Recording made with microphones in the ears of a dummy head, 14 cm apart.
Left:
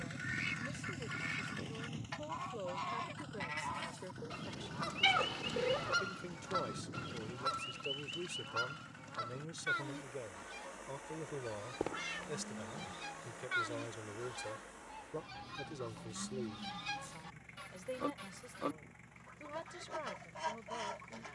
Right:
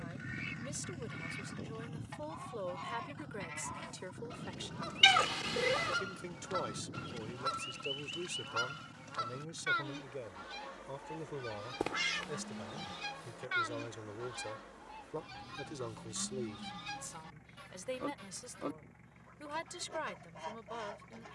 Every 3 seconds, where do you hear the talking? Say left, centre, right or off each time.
right, right, right, centre, centre, right, right.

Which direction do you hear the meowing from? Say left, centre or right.
right.